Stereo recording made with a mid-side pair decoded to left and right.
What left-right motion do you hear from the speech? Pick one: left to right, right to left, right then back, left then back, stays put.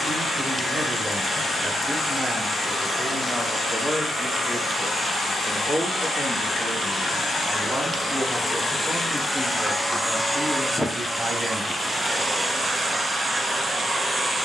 left then back.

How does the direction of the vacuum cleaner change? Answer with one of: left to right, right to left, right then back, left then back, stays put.
left to right.